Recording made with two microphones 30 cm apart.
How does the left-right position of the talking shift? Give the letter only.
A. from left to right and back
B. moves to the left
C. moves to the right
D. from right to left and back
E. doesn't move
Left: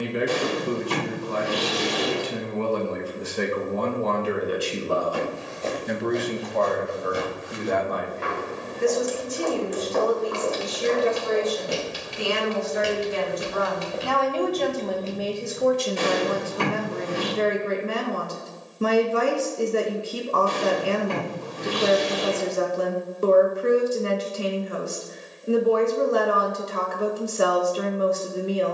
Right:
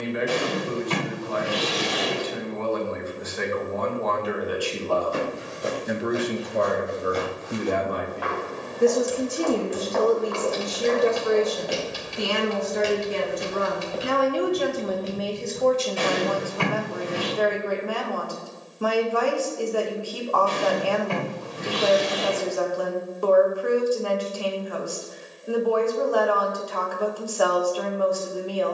A.